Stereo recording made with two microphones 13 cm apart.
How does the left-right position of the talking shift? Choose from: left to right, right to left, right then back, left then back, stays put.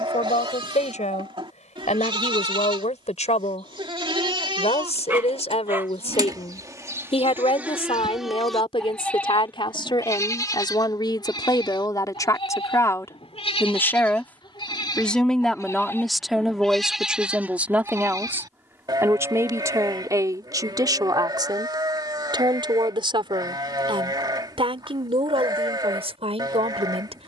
left to right.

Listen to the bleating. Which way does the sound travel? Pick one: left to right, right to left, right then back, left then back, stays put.
left then back.